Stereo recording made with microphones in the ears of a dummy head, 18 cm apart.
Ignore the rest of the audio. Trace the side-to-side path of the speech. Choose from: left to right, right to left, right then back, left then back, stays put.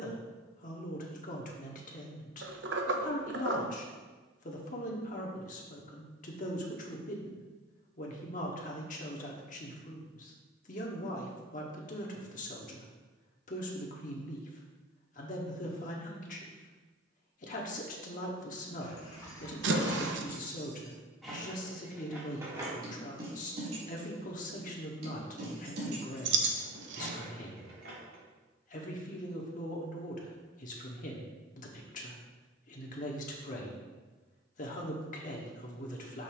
stays put.